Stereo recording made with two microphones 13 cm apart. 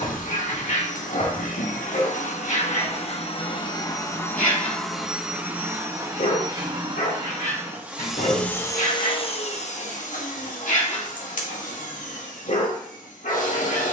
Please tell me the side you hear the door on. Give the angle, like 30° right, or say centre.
80° left.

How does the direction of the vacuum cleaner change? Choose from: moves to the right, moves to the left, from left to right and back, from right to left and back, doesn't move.
from left to right and back.